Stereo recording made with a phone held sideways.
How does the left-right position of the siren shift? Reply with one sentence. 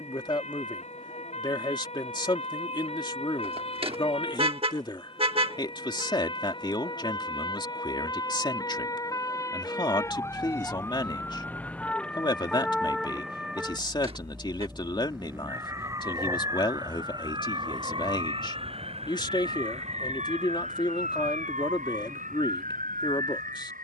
You can hear the siren move to the right.